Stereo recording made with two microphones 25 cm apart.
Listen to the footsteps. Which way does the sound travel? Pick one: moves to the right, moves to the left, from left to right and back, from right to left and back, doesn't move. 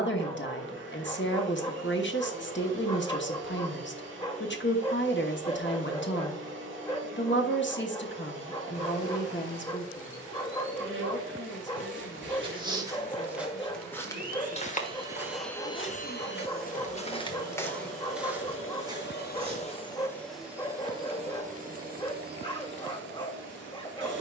from right to left and back.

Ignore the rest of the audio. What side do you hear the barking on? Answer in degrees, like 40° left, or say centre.
20° left.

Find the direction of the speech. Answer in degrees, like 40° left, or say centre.
50° left.